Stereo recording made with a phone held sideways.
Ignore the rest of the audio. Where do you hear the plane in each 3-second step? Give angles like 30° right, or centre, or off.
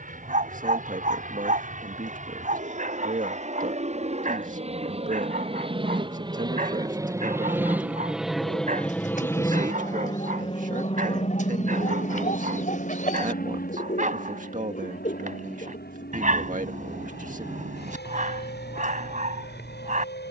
60° right, 50° right, 10° right, 30° left, 60° left, 70° left, 80° left.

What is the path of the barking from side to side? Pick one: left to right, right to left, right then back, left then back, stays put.
stays put.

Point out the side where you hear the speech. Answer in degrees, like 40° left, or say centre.
50° right.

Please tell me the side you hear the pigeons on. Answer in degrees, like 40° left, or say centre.
50° left.